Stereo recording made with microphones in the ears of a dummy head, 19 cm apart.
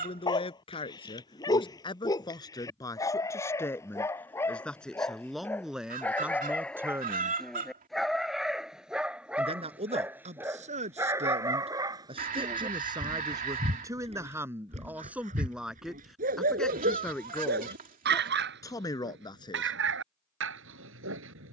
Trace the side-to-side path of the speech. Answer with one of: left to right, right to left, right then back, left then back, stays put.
right then back.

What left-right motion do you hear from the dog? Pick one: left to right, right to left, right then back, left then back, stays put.
left to right.